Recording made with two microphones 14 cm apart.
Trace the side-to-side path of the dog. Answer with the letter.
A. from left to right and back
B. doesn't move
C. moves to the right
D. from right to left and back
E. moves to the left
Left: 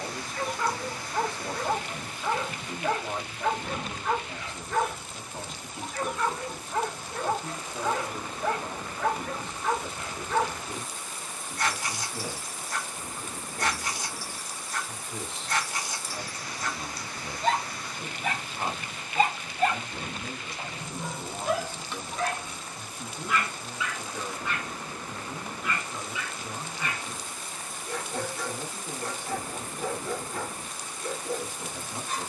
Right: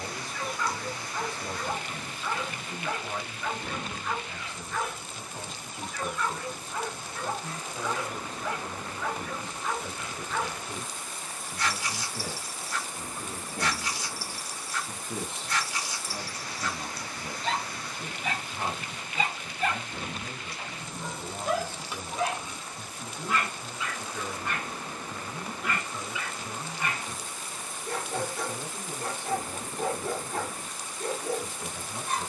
C.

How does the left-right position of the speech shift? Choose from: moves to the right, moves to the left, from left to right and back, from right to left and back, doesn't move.
from left to right and back.